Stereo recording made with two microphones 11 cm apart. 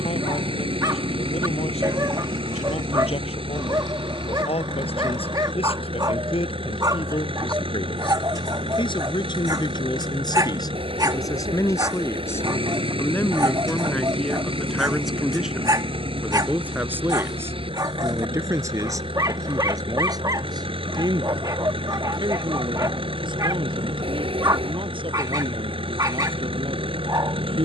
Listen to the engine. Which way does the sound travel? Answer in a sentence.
In this clip you hear the engine stay put.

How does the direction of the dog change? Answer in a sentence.
You can hear the dog stay put.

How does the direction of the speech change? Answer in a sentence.
You can hear the speech travel towards the right.